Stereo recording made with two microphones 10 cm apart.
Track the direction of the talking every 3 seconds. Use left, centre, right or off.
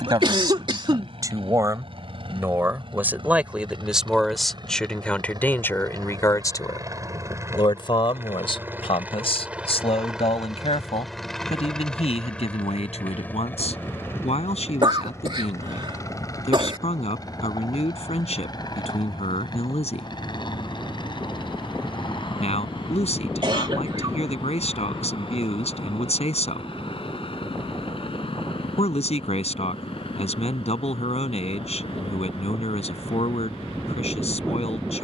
right, centre, left, left, left, left, left, left, left, left, left, left.